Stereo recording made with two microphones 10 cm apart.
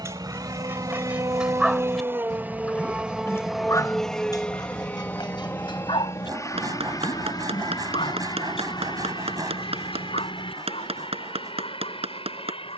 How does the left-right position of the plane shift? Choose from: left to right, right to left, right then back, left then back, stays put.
right to left.